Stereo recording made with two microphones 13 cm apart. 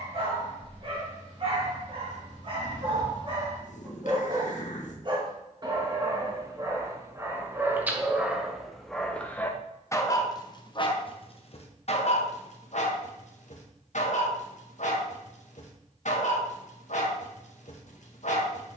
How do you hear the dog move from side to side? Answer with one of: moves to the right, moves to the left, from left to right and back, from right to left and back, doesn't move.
moves to the left.